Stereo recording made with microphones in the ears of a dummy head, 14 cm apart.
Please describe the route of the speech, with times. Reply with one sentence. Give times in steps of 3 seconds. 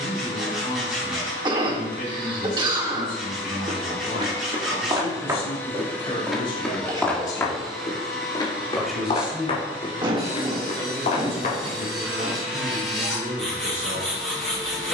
You can hear the speech on the left from 0 s and on the right from 9 s.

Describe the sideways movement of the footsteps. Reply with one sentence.
You can hear the footsteps go from the right side to the left.